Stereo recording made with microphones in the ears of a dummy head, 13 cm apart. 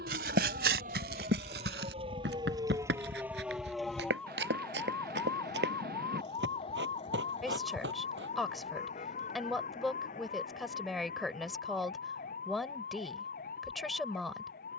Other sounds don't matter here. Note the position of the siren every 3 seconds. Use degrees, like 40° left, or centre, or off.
40° right, 10° left, 40° left, 50° left, 60° left.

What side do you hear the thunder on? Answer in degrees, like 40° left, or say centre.
60° right.